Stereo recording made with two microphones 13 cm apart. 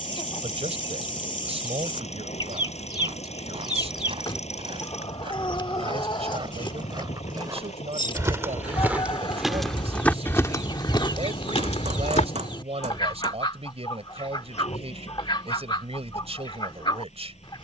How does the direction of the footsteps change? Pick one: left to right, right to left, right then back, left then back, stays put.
right to left.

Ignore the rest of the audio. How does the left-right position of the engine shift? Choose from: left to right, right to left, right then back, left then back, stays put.
stays put.